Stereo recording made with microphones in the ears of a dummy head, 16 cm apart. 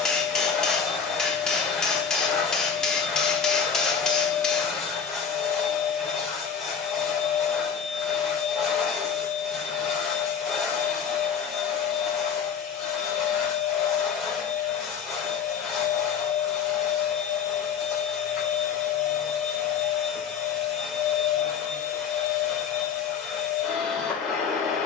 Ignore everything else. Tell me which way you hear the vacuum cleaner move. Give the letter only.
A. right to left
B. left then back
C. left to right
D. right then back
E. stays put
E.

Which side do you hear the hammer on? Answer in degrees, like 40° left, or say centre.
centre.